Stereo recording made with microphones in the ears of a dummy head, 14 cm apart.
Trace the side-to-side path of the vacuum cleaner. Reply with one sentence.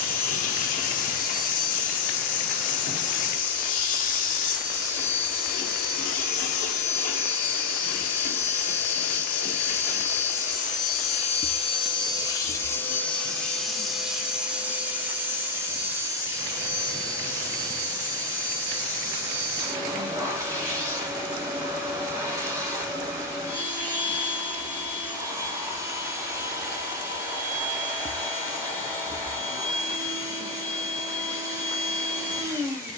In this clip you hear the vacuum cleaner move from left to right.